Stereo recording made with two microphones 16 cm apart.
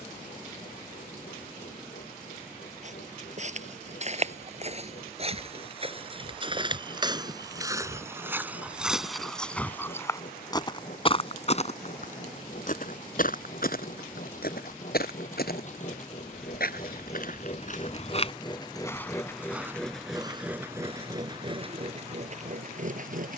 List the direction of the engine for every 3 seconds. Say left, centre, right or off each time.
left, left, left, left, left, left, centre, right.